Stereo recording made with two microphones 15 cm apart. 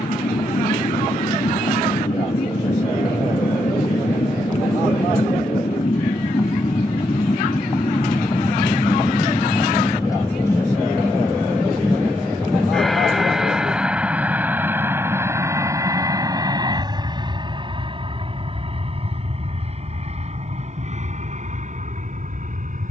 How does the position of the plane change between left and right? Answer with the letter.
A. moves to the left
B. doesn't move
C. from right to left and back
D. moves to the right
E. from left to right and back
D.